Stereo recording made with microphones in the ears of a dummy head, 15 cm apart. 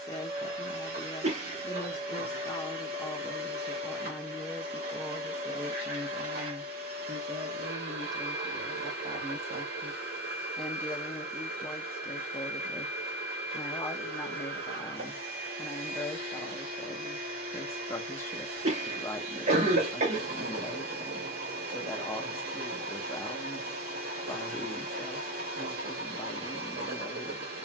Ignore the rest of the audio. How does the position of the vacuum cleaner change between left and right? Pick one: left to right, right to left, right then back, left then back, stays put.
stays put.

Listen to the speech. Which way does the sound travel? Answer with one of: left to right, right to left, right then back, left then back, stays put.
right then back.